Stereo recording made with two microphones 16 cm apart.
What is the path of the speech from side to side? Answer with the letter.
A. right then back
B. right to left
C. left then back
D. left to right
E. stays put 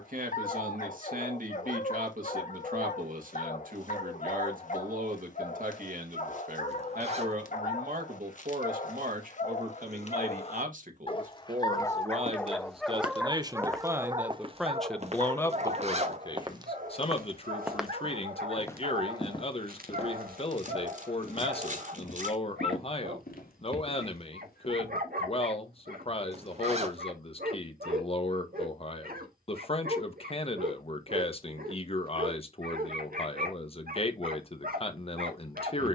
B.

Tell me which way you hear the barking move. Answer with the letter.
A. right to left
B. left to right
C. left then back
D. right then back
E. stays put
B.